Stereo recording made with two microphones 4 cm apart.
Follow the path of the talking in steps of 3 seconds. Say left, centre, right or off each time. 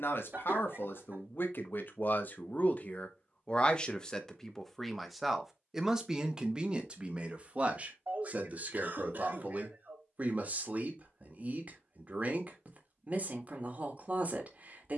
left, centre, right, right, right.